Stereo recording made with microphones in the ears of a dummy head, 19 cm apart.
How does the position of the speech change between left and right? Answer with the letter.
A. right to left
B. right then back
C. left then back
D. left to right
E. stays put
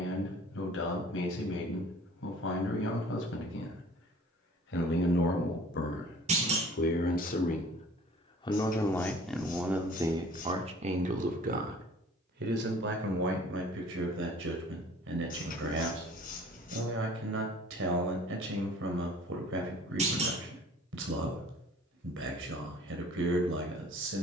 D.